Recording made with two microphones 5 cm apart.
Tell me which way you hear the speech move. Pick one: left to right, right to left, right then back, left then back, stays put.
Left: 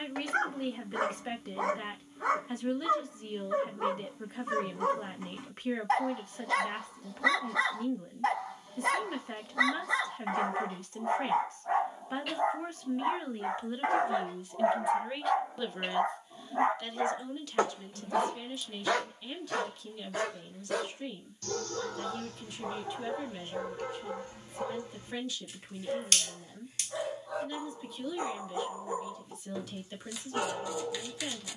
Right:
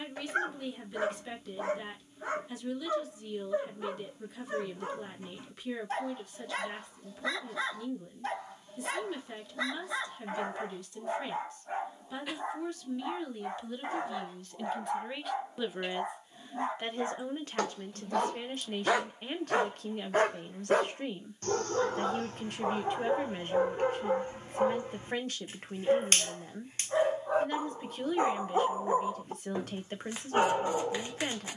left to right.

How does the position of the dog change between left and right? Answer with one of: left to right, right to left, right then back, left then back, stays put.
left to right.